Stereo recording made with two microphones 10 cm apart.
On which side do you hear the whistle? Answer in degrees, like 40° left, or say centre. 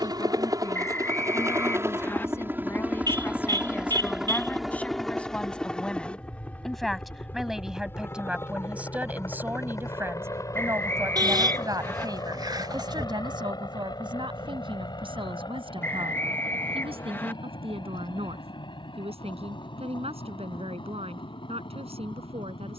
20° left.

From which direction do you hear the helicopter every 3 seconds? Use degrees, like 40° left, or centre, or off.
30° right, centre, 20° left, 30° left, 40° left, 50° left, 50° left, 50° left.